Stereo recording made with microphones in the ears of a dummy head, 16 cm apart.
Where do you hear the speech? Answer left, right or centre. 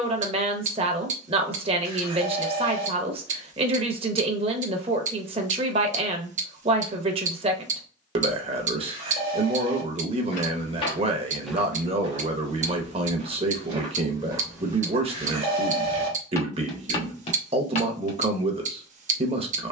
right.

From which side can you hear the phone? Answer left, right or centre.
right.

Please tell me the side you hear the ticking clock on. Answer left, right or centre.
right.